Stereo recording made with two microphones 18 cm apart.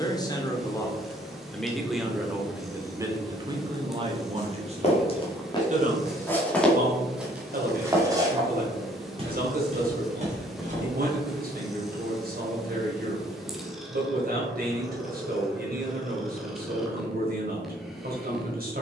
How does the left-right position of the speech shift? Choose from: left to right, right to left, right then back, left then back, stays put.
left to right.